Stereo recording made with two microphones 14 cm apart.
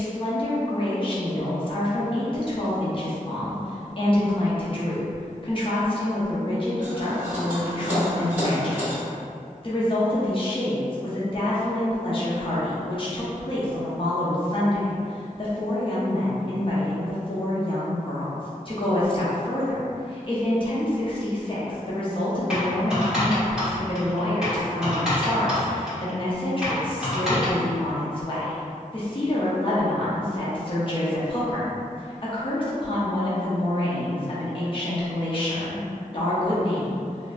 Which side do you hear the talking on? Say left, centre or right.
left.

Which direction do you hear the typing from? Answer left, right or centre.
centre.